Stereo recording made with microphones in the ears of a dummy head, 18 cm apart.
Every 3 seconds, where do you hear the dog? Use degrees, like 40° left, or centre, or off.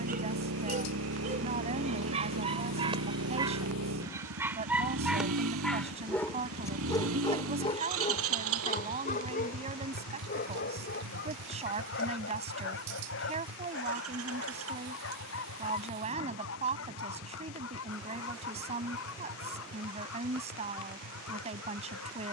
30° right, 10° right, 30° left, 50° left, 70° left, 80° left, 80° left, 80° left.